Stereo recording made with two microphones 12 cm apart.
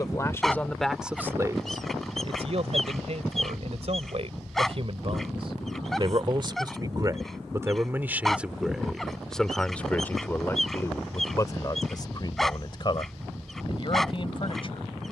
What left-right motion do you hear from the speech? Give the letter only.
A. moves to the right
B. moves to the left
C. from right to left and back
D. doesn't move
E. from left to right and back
E.